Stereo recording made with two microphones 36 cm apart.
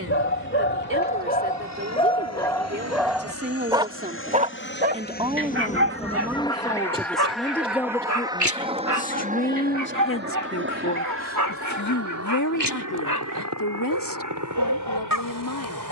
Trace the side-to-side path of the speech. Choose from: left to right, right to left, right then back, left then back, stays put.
right to left.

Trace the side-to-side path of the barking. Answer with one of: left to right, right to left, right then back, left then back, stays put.
left to right.